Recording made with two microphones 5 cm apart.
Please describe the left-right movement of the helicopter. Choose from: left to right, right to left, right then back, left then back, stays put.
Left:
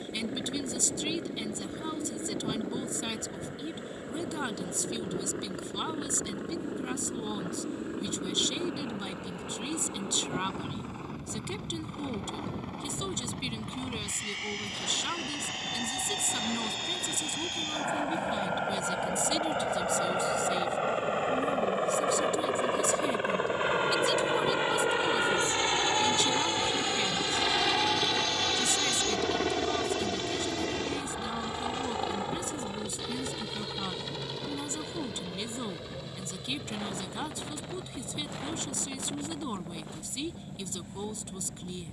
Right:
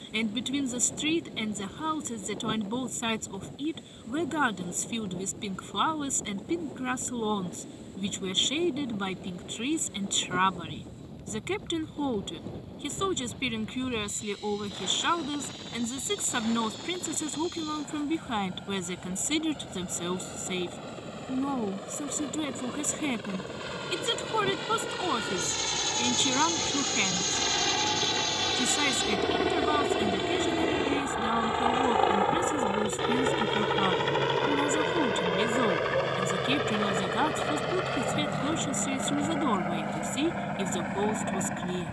left to right.